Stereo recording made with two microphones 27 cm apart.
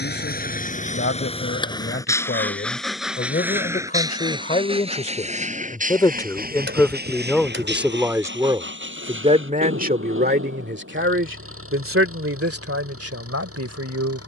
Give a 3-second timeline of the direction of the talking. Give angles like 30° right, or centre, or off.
40° left, 30° left, centre, 40° right, 60° right.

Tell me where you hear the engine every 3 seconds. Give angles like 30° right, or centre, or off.
20° left, 20° right, 40° right, 50° right, 50° right.